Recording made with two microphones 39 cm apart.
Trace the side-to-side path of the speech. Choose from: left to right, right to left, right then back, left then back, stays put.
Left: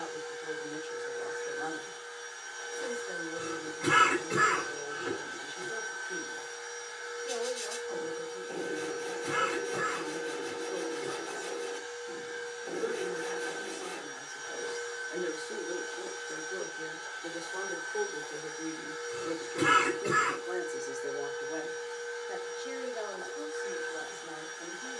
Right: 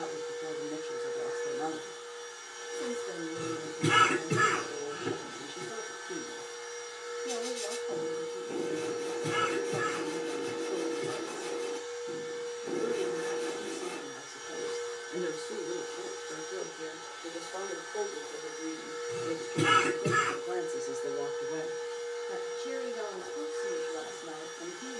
left then back.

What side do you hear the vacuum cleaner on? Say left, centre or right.
centre.